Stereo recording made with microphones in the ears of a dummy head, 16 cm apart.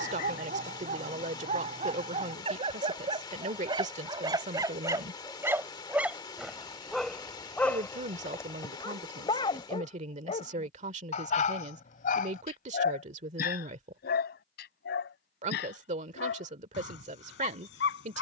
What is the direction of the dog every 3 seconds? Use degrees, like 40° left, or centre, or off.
40° right, 20° right, 10° left, 40° left, 60° left, 70° left.